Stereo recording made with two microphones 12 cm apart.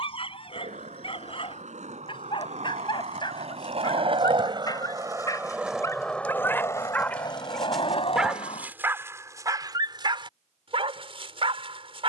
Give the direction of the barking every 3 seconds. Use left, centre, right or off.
left, left, centre, right.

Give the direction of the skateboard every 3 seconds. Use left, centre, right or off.
right, right, left, off.